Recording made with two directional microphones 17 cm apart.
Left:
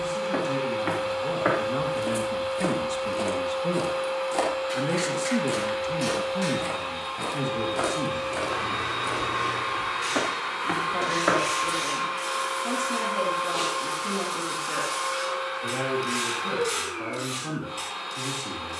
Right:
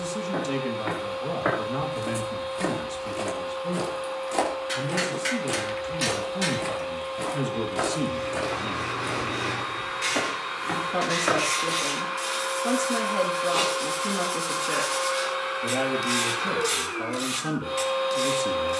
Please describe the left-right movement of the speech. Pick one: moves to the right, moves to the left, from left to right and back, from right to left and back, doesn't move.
from right to left and back.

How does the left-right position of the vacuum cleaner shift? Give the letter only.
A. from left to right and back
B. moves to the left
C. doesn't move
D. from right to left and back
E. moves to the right
E.